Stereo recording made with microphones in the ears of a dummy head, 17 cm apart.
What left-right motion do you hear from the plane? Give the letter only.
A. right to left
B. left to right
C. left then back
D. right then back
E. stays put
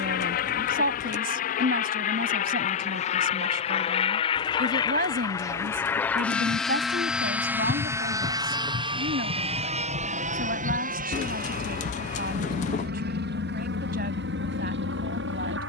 B.